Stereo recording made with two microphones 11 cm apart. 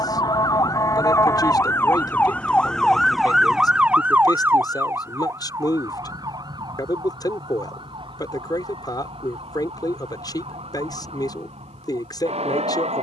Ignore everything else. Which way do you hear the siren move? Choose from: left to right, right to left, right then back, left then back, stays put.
left to right.